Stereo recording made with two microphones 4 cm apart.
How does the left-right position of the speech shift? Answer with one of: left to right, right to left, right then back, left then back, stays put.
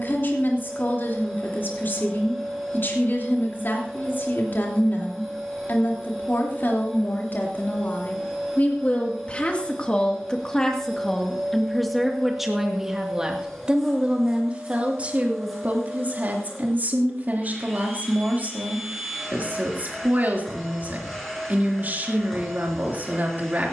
left to right.